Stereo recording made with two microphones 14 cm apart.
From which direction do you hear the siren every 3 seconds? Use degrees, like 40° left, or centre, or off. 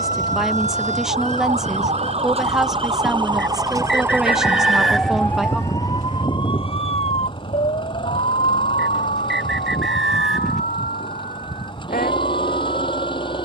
50° right, 10° right, 50° left, 70° left, 80° left.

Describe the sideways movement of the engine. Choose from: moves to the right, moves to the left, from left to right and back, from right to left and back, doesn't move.
doesn't move.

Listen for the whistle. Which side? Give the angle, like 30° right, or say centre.
centre.